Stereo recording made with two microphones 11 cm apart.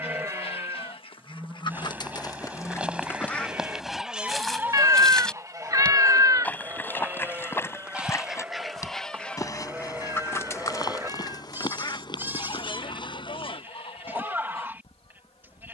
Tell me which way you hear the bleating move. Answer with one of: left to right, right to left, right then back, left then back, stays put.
stays put.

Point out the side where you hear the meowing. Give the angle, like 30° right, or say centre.
30° right.